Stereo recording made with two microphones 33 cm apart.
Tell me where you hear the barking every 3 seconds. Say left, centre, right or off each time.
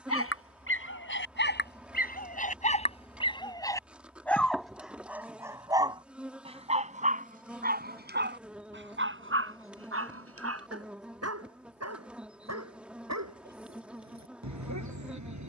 left, centre, right, right, right.